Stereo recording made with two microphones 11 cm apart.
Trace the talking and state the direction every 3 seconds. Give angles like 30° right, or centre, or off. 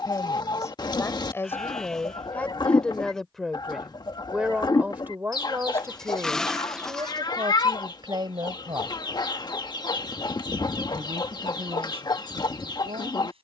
20° left, 10° right, 40° right, 60° right, 70° right.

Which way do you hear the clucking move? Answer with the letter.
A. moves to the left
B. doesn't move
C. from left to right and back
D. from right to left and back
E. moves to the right
B.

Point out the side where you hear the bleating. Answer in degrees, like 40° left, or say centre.
centre.